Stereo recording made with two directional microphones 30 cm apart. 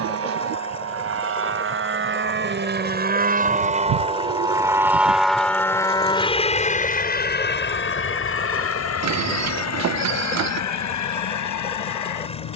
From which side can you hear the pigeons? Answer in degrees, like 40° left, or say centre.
60° right.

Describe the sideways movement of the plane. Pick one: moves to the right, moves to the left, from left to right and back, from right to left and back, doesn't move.
moves to the left.